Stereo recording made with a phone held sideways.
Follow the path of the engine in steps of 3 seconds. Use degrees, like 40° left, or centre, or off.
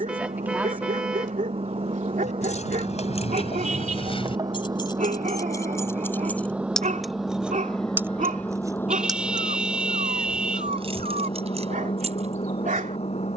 40° right, 30° right, centre, 30° left, 50° left.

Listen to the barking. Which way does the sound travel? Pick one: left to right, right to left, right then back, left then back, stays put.
stays put.